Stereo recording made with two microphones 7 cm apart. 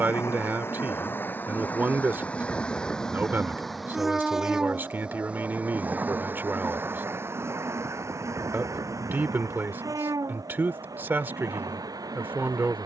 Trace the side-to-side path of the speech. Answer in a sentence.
You can hear the speech stay put.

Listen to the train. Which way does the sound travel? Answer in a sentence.
You can hear the train travel towards the right.